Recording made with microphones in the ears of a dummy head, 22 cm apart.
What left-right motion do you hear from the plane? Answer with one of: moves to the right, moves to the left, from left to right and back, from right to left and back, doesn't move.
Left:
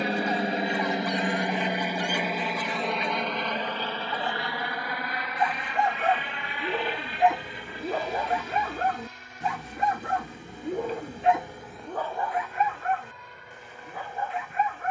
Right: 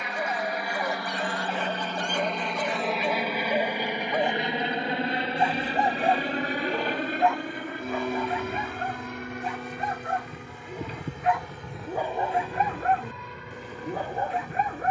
moves to the right.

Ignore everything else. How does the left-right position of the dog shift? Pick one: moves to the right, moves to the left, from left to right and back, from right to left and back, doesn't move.
from right to left and back.